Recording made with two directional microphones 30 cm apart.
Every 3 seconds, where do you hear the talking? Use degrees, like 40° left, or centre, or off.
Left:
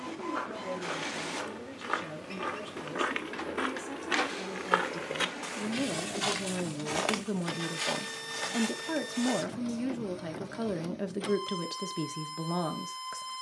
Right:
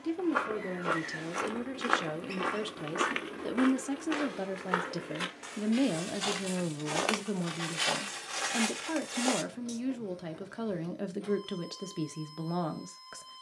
70° right, 40° right, centre, 10° left, 10° left.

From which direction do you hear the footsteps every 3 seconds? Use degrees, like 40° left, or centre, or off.
30° right, 20° left, 10° right, 40° right, off.